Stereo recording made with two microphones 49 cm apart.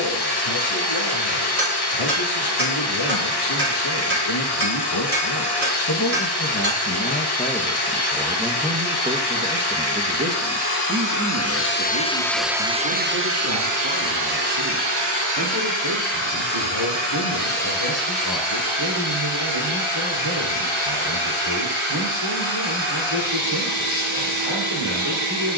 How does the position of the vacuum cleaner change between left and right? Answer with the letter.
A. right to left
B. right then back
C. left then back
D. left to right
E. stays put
D.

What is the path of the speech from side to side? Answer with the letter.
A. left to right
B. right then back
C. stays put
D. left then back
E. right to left
A.